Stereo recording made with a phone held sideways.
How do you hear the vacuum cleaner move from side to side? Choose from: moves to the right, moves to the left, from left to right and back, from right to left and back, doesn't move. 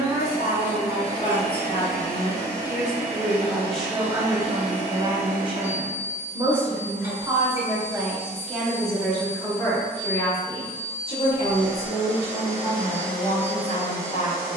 from right to left and back.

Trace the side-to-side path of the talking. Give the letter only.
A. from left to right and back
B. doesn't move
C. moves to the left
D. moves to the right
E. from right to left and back
A.